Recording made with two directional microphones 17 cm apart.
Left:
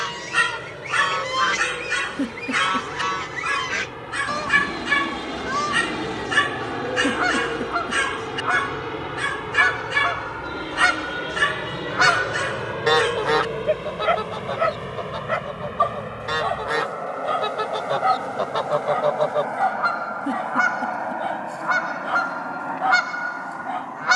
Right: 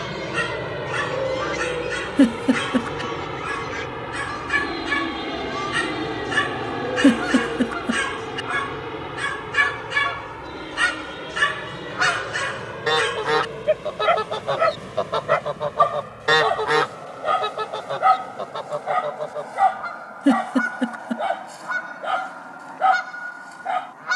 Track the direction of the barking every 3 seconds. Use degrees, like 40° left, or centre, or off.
30° left, 20° left, 10° left, centre, 10° right, 20° right, 30° right, 30° right.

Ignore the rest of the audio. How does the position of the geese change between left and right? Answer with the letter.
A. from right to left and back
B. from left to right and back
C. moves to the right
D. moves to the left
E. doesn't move
B.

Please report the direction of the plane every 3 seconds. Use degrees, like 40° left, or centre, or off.
40° right, 20° right, centre, 20° left, 30° left, 40° left, 50° left, 50° left.